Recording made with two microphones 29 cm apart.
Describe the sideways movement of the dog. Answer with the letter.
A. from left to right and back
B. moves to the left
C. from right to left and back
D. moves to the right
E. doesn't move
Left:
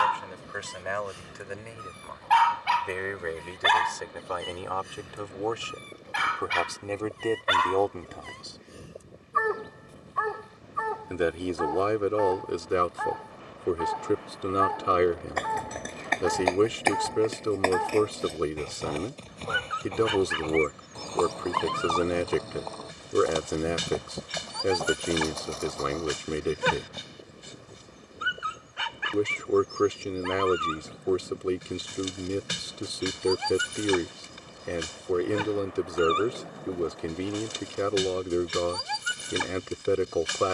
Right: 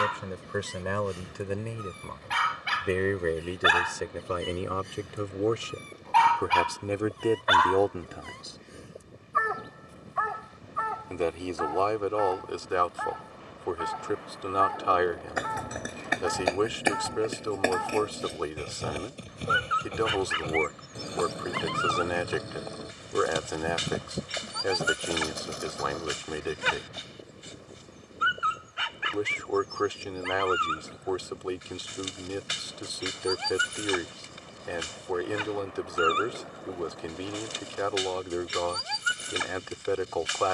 B.